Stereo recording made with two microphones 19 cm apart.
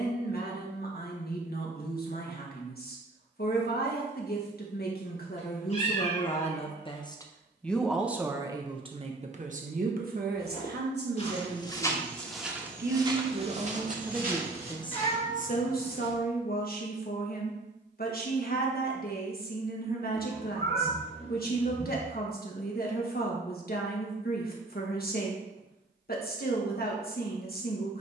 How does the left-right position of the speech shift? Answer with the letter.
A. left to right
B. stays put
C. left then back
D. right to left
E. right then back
E.